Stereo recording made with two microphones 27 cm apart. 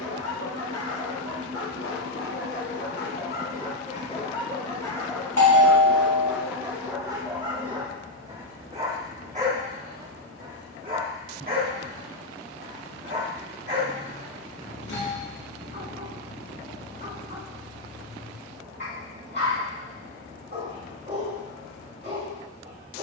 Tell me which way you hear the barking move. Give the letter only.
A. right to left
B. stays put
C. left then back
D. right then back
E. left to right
E.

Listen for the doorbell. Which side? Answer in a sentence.
In this clip you hear the doorbell on the left.